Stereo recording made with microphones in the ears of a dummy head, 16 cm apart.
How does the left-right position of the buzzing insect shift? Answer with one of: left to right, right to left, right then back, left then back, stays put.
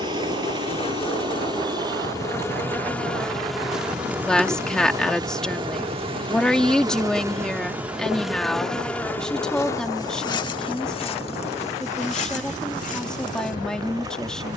right then back.